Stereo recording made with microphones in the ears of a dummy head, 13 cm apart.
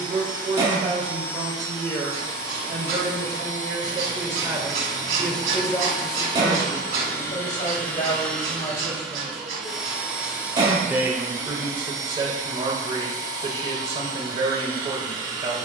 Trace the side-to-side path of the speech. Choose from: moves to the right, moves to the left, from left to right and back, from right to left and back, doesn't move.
from right to left and back.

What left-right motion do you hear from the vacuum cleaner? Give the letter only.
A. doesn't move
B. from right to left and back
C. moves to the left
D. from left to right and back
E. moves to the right
E.